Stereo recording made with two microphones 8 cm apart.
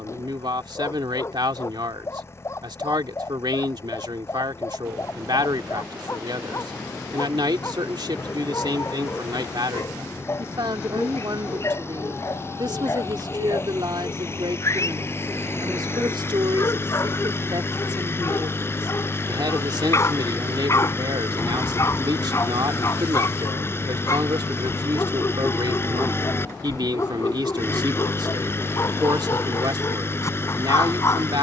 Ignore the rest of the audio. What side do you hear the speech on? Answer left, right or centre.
right.